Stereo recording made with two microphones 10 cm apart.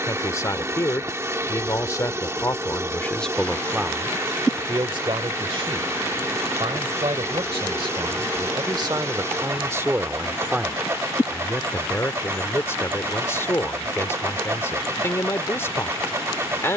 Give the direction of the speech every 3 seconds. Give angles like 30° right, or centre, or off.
30° left, 30° right, 50° right, 10° right, 20° left, 20° left.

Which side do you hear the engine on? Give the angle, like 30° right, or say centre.
30° right.